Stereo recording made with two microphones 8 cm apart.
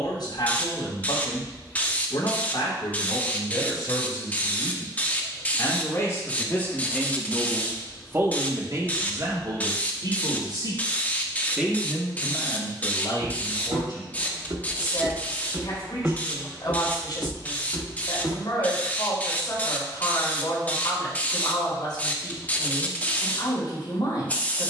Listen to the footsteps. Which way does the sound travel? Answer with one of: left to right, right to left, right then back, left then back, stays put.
right to left.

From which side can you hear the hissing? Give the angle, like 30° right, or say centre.
20° left.